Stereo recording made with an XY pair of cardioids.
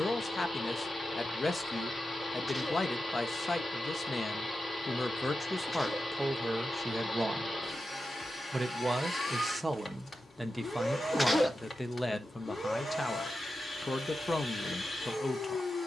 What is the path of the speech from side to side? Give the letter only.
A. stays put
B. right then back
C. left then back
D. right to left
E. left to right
B.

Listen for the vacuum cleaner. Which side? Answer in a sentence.
In this clip you hear the vacuum cleaner on the left.